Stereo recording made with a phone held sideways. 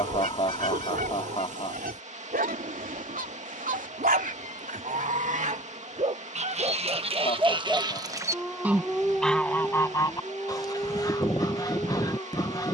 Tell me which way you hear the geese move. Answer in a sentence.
You can hear the geese go from the right side to the left.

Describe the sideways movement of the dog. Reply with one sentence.
You can hear the dog travel towards the left.